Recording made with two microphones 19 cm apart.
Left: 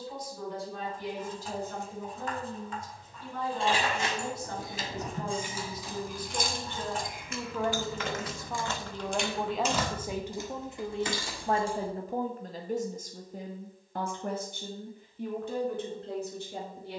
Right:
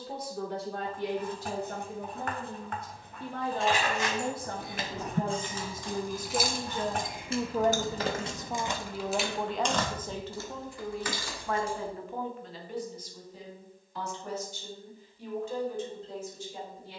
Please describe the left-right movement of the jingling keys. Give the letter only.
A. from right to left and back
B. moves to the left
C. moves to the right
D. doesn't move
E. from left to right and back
E.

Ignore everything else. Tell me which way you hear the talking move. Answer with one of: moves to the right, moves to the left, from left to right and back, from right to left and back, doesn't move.
moves to the left.